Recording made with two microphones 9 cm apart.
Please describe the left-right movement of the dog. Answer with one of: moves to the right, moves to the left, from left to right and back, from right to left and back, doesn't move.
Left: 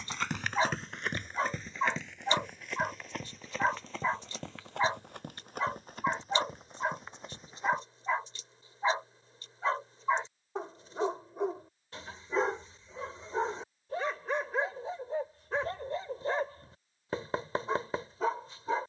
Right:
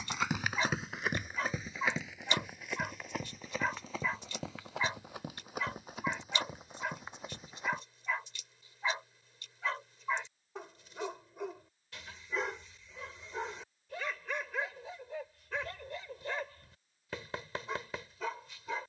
doesn't move.